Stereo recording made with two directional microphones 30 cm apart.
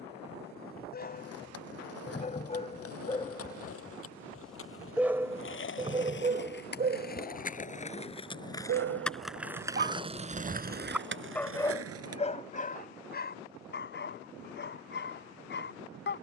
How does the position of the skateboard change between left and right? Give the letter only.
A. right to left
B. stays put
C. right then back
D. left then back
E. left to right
E.